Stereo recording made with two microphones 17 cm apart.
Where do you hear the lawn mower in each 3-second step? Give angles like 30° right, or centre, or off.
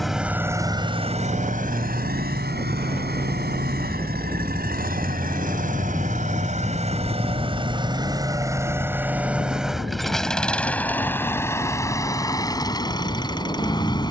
50° right, 70° right, 30° right, 10° left, 20° left.